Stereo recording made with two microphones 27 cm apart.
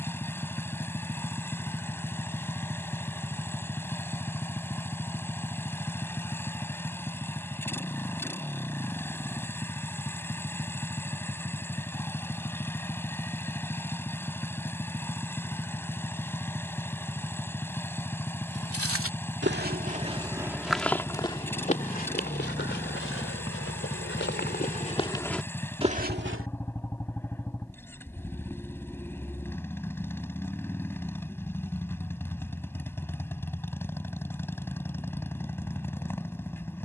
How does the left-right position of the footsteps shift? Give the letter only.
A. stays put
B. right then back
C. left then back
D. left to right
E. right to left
C.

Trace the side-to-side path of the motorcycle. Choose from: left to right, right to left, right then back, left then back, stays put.
stays put.